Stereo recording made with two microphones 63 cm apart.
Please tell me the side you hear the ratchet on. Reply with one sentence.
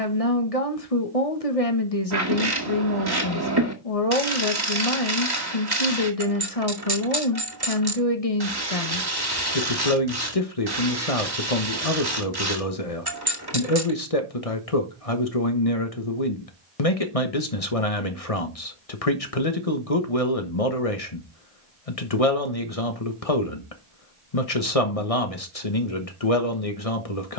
You can hear the ratchet on the right.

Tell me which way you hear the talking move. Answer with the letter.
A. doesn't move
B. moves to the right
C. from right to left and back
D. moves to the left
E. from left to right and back
A.